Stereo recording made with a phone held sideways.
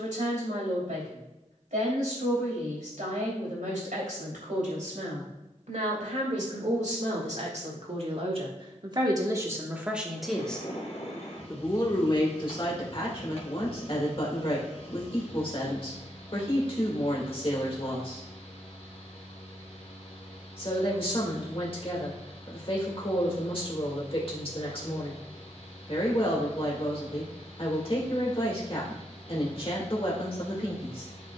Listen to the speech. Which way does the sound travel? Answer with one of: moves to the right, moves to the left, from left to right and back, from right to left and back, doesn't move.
moves to the left.